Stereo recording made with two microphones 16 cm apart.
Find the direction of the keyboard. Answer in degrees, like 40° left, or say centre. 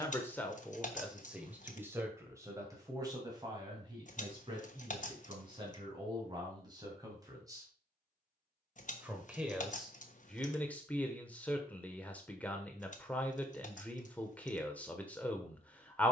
50° left.